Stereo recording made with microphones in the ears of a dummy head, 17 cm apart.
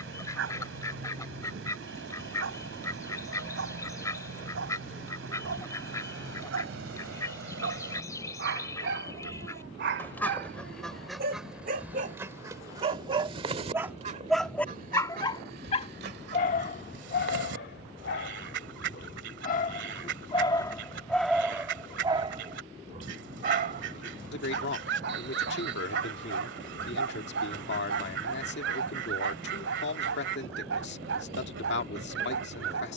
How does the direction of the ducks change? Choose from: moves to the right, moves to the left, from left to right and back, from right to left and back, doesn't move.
moves to the right.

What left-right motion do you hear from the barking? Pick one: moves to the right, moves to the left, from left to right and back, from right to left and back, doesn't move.
from right to left and back.